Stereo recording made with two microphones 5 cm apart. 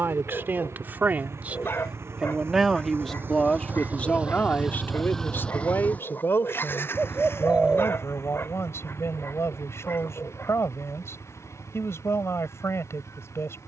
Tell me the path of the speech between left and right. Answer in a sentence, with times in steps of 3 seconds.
You can hear the speech on the right from 0 s and on the left from 3 s.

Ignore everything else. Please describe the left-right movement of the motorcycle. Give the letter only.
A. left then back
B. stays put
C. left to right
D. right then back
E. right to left
E.